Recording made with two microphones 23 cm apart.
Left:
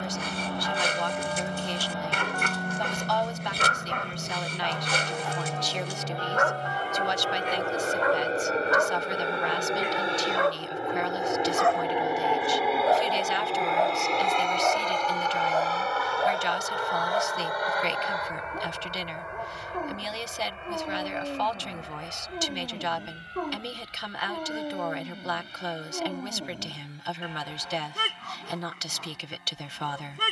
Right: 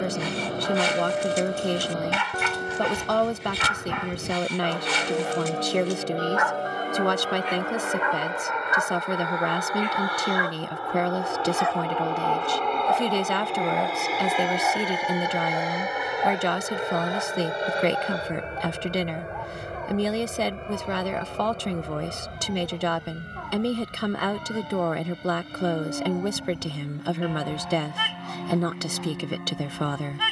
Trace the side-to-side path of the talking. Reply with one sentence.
You can hear the talking stay put.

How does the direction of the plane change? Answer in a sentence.
You can hear the plane go from the left side to the right.